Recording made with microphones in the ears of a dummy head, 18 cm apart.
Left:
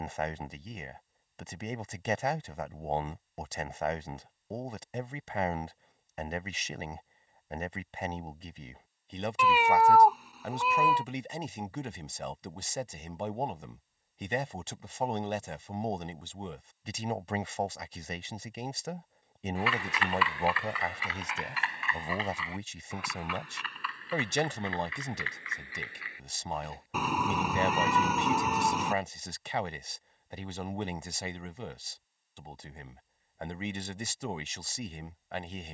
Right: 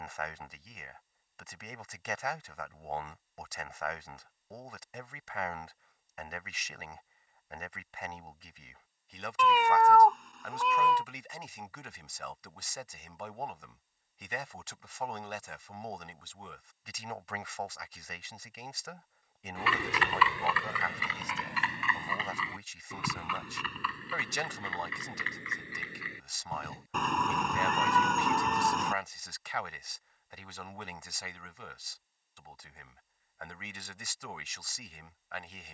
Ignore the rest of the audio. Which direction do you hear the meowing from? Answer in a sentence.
In this clip you hear the meowing in the centre.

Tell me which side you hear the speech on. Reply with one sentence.
You can hear the speech on the left.